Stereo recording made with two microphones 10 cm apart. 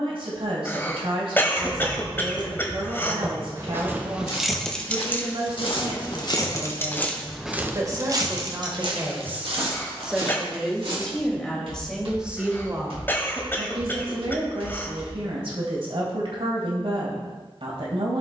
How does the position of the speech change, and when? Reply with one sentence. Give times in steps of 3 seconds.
In this clip you hear the speech on the right from 0 s, in the centre from 9 s and on the right from 12 s.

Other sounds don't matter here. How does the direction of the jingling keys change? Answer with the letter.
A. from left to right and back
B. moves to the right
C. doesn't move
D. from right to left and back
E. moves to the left
D.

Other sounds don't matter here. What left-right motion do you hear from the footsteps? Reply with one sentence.
You can hear the footsteps move to the right.